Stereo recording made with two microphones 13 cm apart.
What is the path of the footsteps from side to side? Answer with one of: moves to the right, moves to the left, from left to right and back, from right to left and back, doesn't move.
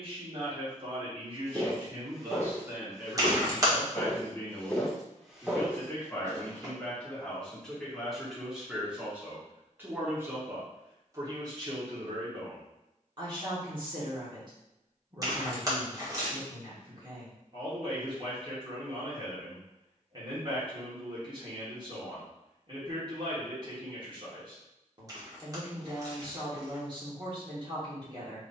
from right to left and back.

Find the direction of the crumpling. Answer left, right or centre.
right.